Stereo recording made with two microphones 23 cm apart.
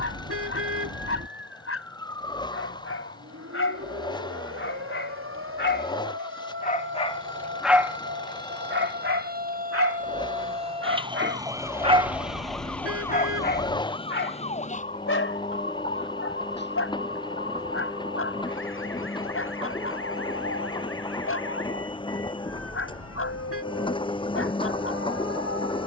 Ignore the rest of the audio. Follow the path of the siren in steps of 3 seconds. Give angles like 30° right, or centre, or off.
70° right, 70° right, 50° right, 30° right, 10° left, 40° left, 60° left, 70° left, 70° left.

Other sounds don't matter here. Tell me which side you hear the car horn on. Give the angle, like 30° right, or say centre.
70° right.